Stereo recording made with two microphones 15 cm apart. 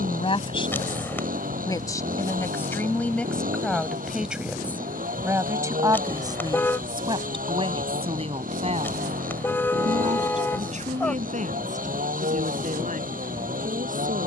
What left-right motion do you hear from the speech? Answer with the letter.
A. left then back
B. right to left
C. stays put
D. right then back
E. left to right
E.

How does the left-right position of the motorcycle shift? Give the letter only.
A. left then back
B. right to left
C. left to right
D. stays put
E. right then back
D.